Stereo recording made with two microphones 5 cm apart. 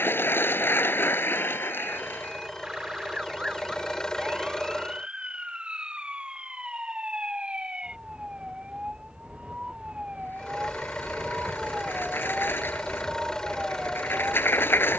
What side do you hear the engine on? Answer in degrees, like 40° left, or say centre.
10° left.